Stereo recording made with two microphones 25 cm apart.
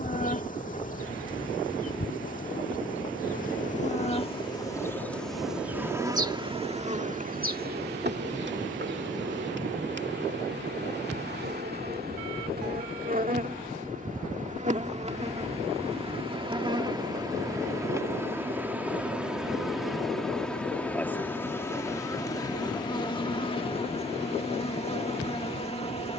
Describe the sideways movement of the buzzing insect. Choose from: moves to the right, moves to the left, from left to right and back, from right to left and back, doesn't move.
from left to right and back.